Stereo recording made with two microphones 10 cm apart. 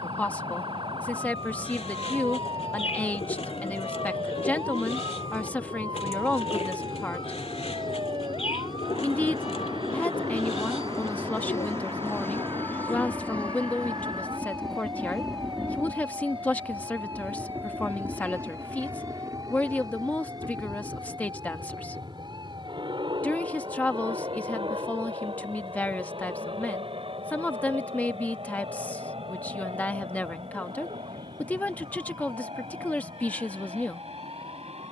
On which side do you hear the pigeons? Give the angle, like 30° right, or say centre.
70° left.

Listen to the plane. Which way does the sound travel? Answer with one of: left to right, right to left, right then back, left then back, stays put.
left to right.